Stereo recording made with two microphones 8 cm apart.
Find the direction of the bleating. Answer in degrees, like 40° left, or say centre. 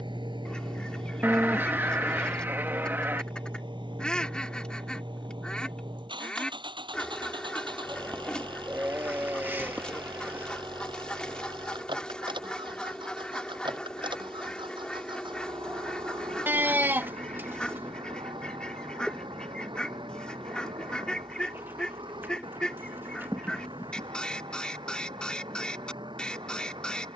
30° right.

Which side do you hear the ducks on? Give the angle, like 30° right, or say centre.
10° left.